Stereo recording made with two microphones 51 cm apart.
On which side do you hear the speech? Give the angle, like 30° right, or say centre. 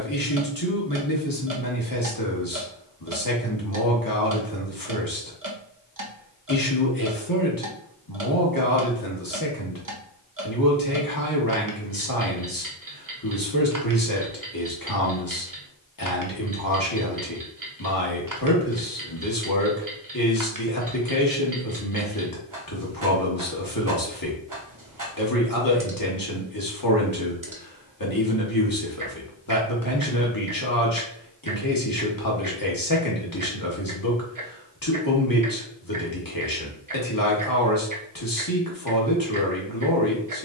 40° left.